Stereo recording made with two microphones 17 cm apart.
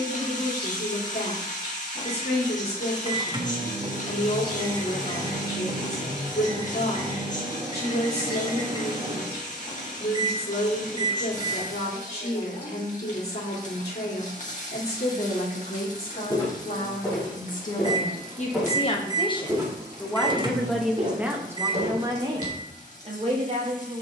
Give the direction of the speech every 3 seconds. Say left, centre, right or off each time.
left, left, left, left, left, left, left, right.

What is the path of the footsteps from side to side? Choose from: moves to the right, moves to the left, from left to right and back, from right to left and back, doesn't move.
moves to the right.